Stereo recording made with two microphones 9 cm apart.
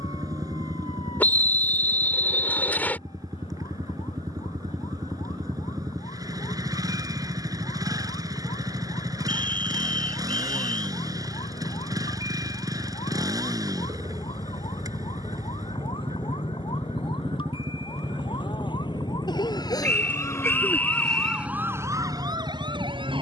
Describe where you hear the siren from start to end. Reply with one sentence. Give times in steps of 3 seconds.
You can hear the siren on the left from 0 s and on the right from 21 s.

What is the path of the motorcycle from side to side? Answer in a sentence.
In this clip you hear the motorcycle stay put.